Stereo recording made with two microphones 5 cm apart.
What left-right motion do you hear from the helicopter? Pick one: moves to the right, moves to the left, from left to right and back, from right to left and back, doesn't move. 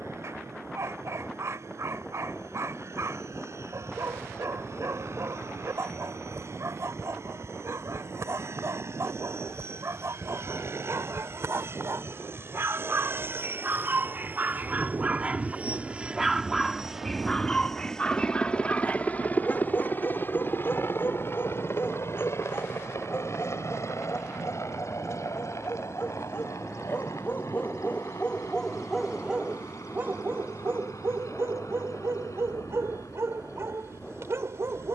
moves to the left.